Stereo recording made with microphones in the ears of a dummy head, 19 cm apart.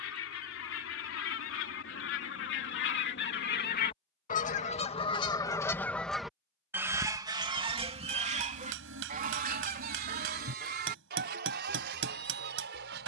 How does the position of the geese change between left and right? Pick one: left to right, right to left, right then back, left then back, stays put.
left to right.